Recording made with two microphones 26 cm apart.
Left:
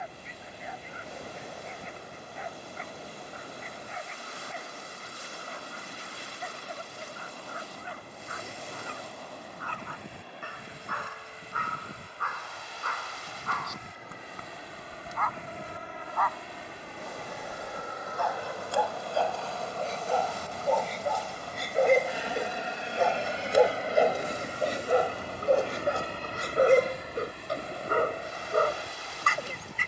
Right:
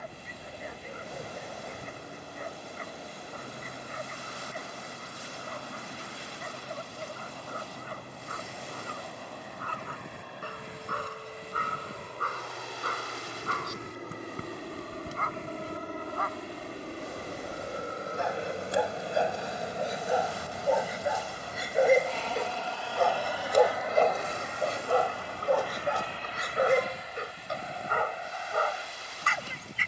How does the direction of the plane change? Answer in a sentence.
You can hear the plane travel towards the left.